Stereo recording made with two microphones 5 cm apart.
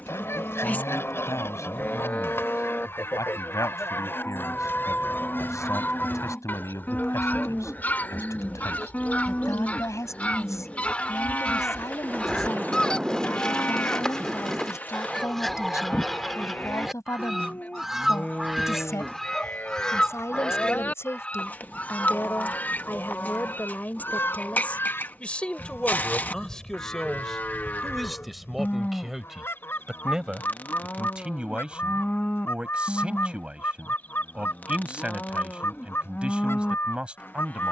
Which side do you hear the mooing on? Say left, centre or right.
left.